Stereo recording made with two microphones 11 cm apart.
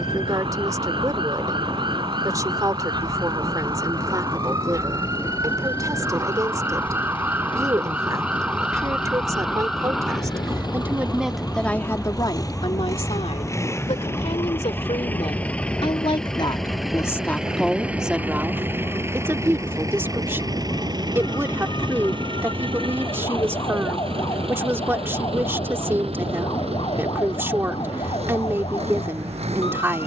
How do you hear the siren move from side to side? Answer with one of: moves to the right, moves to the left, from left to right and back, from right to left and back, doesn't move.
moves to the left.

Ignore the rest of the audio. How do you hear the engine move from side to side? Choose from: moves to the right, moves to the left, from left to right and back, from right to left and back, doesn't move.
moves to the right.